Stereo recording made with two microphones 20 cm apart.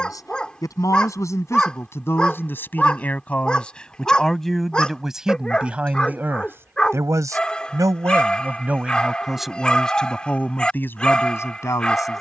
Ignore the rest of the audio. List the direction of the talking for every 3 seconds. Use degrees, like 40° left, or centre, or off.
10° left, centre, 10° right, 10° left.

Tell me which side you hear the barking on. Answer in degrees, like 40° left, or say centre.
centre.